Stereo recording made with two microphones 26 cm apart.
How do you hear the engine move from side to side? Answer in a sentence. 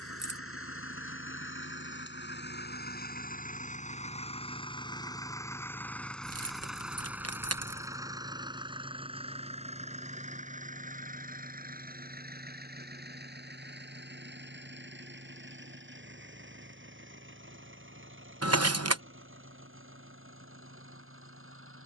In this clip you hear the engine travel towards the right.